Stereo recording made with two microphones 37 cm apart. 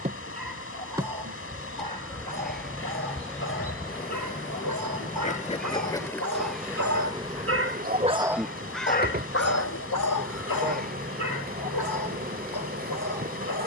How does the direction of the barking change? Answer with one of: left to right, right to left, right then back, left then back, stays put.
right to left.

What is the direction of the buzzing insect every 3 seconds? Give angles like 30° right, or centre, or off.
10° right, 20° left, 10° right, 30° right, 30° right.